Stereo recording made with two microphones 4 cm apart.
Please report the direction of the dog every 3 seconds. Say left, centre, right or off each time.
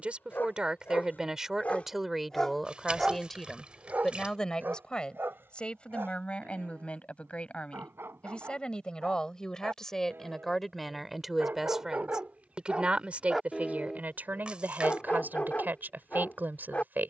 left, right, right, right, centre, left.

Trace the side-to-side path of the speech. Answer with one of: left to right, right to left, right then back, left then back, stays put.
left then back.